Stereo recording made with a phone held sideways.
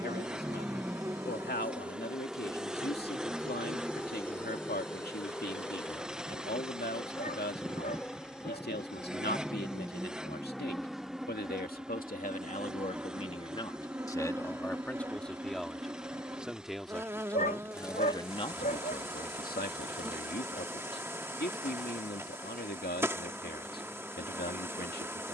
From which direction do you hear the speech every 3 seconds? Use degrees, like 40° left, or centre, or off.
80° left, 80° left, 80° left, 70° left, 30° left, 10° left, 60° left, 70° left, 70° left.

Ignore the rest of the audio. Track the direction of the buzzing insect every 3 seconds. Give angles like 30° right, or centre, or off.
10° right, 10° left, 10° left, centre, 10° right, 20° right, 20° right, 20° right, 20° right.